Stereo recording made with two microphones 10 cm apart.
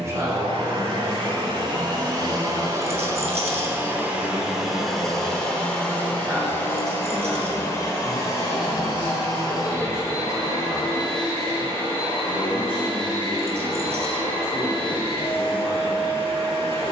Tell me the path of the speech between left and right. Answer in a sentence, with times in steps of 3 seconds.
You can hear the speech on the right from 0 s, in the centre from 6 s and on the left from 9 s.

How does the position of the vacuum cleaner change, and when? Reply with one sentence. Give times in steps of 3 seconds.
In this clip you hear the vacuum cleaner on the right from 0 s, in the centre from 3 s and on the left from 6 s.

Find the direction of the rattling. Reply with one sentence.
In this clip you hear the rattling on the right.